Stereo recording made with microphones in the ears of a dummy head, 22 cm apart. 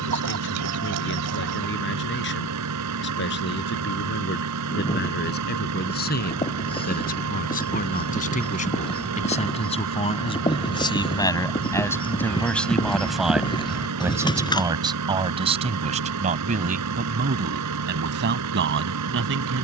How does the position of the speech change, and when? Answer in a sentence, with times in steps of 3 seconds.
You can hear the speech on the left from 0 s, in the centre from 12 s and on the right from 15 s.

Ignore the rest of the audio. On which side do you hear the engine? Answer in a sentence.
You can hear the engine on the right.